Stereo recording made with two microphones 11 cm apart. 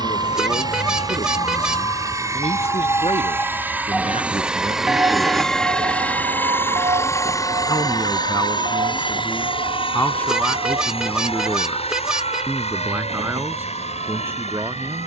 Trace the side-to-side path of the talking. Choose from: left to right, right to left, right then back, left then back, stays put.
left to right.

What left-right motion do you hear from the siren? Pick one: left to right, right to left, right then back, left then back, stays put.
left to right.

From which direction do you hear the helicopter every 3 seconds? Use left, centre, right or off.
right, centre, left, left, left.